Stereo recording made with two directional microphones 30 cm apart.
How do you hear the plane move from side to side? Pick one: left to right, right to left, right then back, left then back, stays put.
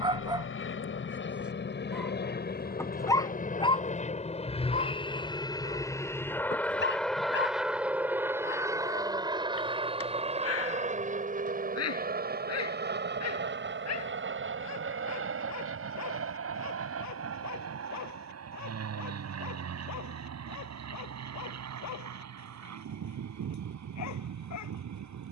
left to right.